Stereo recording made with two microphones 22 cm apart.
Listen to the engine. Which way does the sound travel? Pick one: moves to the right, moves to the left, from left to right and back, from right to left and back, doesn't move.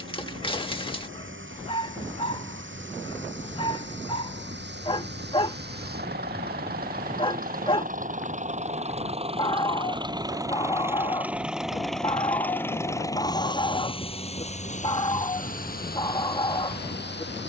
moves to the left.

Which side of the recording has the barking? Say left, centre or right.
left.